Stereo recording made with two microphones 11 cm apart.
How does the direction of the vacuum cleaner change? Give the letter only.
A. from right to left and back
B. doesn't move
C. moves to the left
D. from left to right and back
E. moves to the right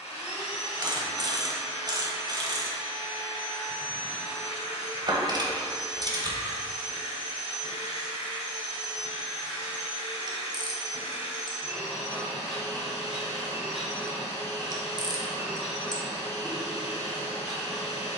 B.